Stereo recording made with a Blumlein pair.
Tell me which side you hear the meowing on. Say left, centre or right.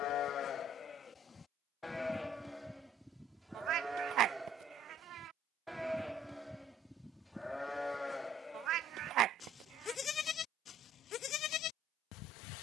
right.